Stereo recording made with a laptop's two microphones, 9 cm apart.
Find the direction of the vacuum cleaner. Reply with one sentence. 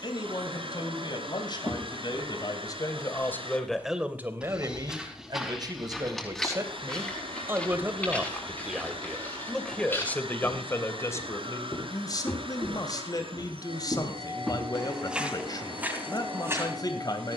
In this clip you hear the vacuum cleaner on the right.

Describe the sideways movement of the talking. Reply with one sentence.
You can hear the talking move from left to right and back again.